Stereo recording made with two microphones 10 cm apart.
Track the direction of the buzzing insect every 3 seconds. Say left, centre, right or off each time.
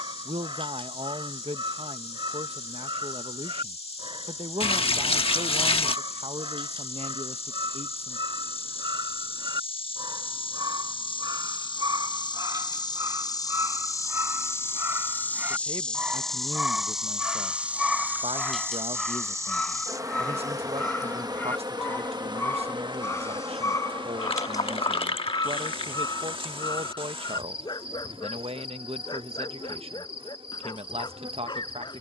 left, left, left, left, left, centre, right, right, right, right, right.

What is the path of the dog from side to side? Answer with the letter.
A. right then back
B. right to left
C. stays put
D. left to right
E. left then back
B.